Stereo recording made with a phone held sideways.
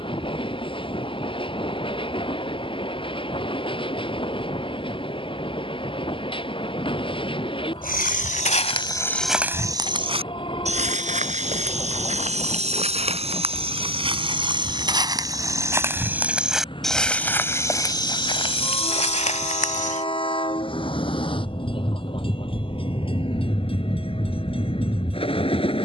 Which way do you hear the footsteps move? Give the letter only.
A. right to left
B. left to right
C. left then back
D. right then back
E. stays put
D.